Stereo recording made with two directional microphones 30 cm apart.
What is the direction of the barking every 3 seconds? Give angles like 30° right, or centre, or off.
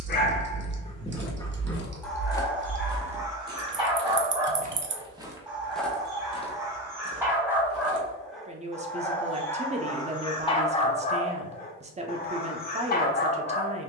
10° left, 10° right, 10° right, 20° left, 30° left.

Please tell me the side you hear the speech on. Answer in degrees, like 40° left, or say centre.
20° right.